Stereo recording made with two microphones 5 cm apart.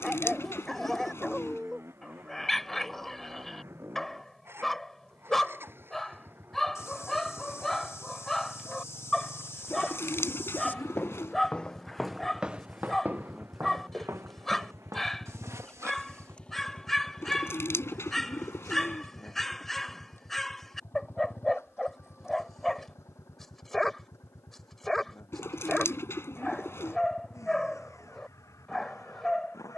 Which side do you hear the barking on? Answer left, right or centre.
centre.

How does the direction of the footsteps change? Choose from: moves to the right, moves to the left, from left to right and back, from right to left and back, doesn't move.
moves to the right.